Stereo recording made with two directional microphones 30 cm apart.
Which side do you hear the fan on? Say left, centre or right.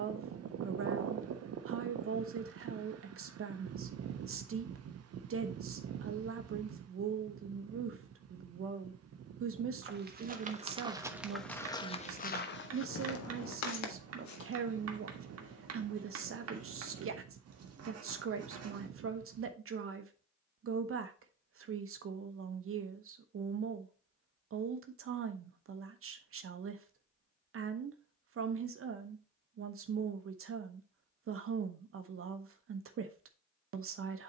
right.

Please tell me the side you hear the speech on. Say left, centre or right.
right.